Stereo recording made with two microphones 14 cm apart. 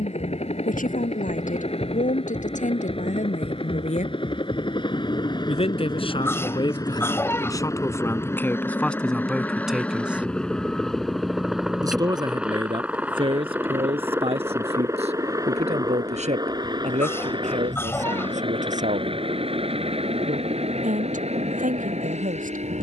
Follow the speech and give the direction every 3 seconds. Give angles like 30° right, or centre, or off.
60° left, 50° left, 20° left, 10° right, 40° right, 50° right, 60° right, 60° right.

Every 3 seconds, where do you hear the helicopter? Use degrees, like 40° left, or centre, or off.
50° left, 40° left, 20° left, 10° left, 10° right, 30° right, 40° right, 50° right.